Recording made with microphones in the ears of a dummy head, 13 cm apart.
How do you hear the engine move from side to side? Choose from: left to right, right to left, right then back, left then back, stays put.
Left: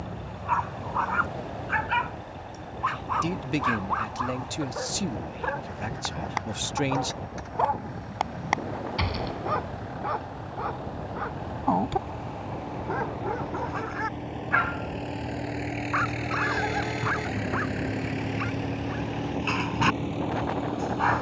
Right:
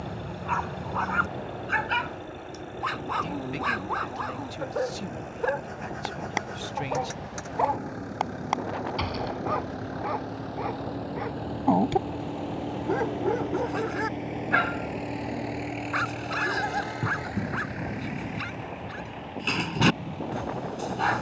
right to left.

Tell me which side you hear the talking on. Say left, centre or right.
left.